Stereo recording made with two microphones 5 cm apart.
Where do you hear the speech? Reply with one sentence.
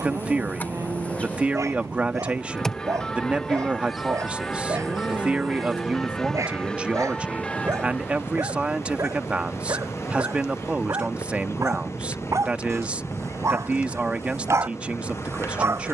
In this clip you hear the speech on the right.